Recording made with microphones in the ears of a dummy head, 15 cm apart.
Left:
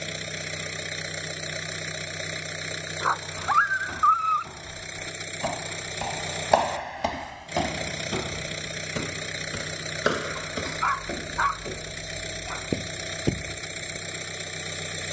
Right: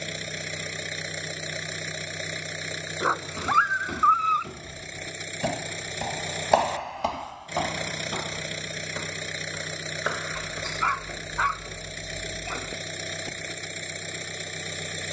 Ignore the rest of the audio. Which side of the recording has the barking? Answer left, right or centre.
right.